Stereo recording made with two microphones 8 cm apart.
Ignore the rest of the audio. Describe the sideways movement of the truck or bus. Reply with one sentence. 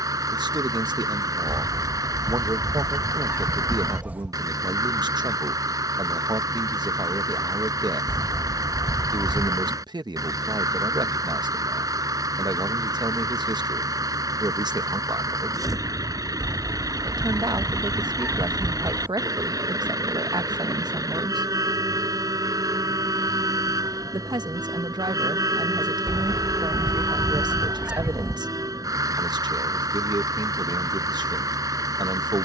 You can hear the truck or bus stay in one place.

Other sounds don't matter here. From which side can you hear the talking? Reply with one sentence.
You can hear the talking on the right.